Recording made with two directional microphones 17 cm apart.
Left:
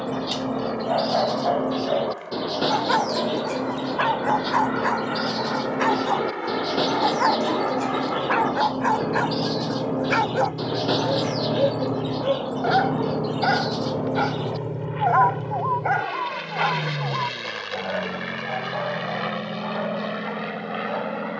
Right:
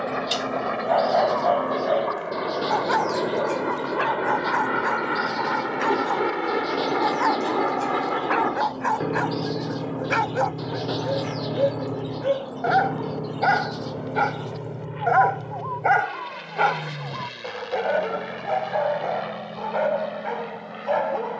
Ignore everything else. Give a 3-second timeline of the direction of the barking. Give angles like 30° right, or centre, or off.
10° right, 20° left, 10° left, centre, 10° right, 30° right, 40° right.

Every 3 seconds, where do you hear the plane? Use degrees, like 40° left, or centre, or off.
50° right, 30° right, 20° right, centre, 20° left, 30° left, 40° left.